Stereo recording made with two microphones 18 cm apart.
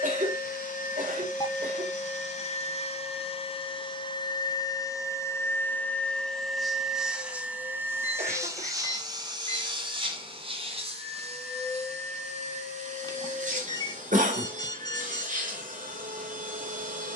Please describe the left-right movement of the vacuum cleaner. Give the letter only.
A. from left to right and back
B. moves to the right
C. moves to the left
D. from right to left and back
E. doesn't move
B.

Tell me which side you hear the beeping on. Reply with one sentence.
In this clip you hear the beeping on the left.